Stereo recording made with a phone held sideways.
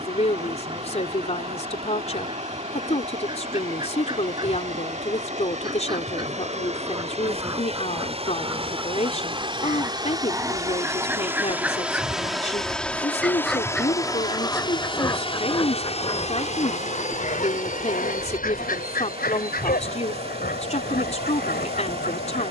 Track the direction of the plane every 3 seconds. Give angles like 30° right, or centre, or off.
60° right, 60° right, 50° right, 20° right, 10° left, 40° left, 60° left, 70° left.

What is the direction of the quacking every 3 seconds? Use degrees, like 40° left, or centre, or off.
30° right, 30° right, 20° right, 10° right, 10° left, 40° left, 70° left, 80° left.